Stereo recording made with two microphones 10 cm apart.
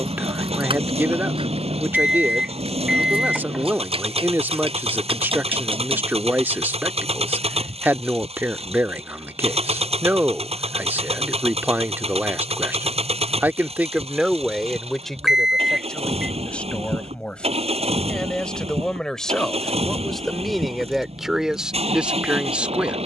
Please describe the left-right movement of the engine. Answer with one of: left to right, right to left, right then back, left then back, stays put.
stays put.